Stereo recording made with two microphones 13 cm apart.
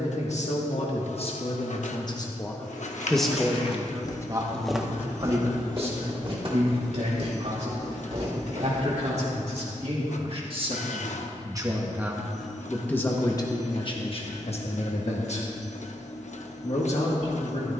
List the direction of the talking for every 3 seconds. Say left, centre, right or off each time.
left, right, right, right, left, left.